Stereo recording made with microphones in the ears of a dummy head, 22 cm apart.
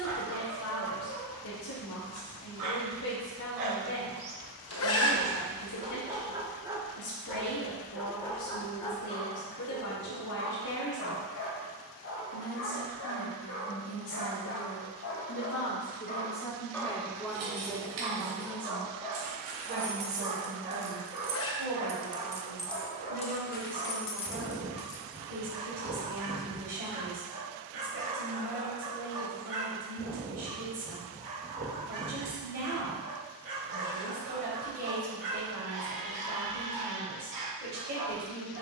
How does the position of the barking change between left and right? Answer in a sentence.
In this clip you hear the barking go left and come back.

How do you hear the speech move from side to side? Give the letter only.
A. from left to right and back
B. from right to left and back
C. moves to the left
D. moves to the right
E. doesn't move
D.